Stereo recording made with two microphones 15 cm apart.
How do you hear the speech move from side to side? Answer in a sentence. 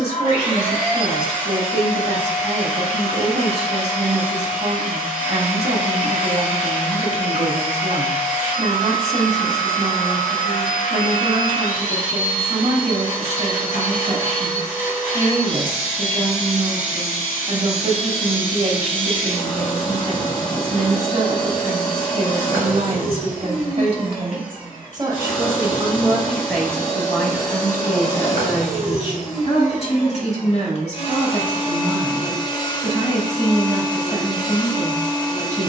In this clip you hear the speech move to the left.